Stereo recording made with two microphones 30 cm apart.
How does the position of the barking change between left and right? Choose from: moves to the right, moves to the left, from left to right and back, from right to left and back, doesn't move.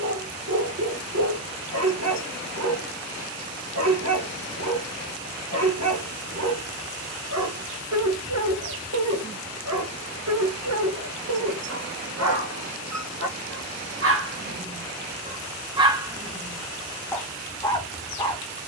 moves to the left.